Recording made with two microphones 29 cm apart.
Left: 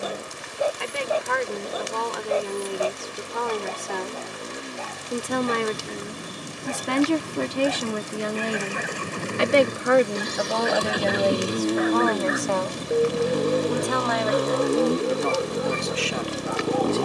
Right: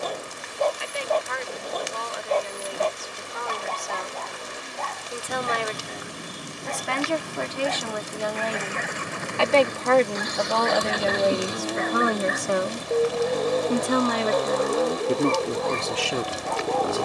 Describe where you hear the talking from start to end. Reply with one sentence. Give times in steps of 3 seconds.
In this clip you hear the talking on the left from 0 s, in the centre from 9 s and on the right from 12 s.